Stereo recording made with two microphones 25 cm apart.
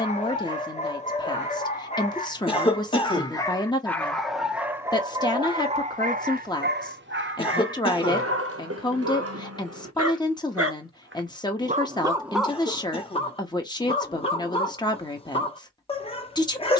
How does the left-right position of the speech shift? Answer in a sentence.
In this clip you hear the speech stay in one place.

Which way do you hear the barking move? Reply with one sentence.
In this clip you hear the barking move from left to right and back again.